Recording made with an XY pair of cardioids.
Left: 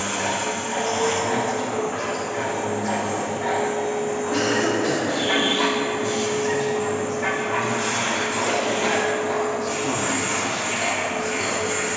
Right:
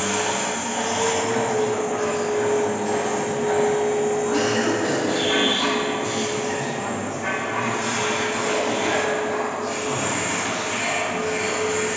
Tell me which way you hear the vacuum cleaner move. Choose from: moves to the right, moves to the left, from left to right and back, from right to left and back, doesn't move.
moves to the left.